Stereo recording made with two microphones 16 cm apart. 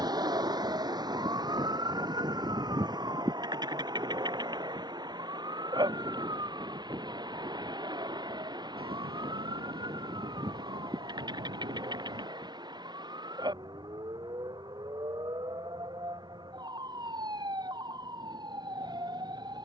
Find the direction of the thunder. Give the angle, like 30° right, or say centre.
70° right.